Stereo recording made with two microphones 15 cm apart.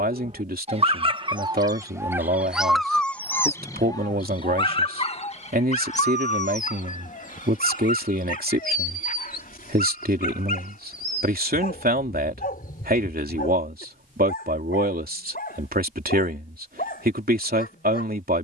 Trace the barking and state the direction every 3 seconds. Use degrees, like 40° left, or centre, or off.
30° right, 30° left, 60° left, 70° left, 70° left, 80° left.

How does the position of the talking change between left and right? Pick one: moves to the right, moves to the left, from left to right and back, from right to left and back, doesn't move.
doesn't move.